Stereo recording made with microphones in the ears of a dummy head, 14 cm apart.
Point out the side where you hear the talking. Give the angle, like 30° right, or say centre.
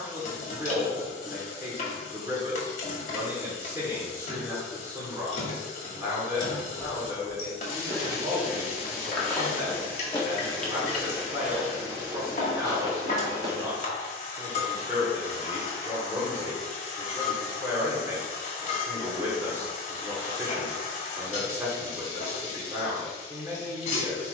20° right.